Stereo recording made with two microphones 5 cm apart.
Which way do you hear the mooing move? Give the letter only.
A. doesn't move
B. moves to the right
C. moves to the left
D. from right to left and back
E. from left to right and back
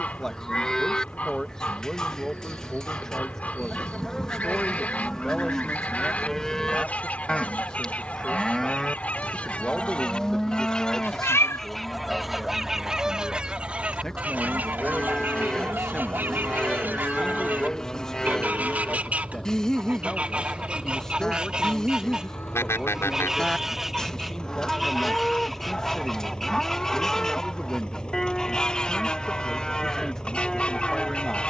A.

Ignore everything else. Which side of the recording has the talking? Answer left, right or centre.
centre.